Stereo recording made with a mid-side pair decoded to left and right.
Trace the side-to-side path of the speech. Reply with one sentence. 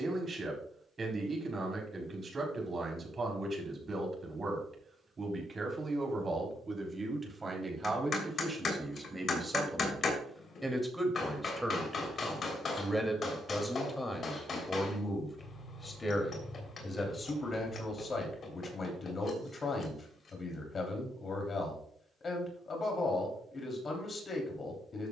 In this clip you hear the speech travel towards the left.